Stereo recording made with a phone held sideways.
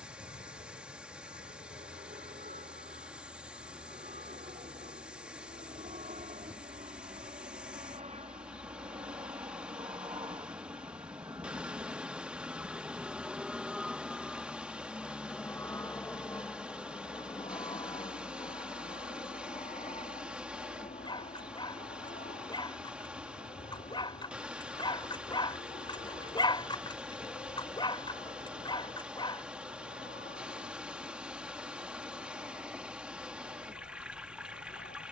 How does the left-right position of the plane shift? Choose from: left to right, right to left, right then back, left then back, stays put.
right to left.